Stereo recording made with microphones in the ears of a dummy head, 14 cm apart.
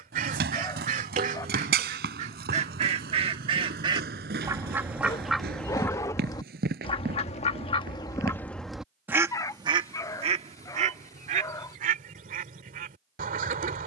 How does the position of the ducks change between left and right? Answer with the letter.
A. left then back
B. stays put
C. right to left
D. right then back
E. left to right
A.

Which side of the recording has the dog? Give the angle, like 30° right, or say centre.
20° left.